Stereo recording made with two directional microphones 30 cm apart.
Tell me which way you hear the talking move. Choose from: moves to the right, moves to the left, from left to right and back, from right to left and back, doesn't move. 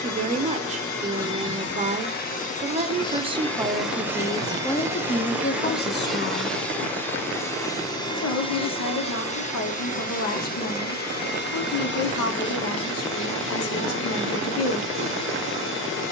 moves to the left.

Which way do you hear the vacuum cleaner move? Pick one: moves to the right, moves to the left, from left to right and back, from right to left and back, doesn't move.
from left to right and back.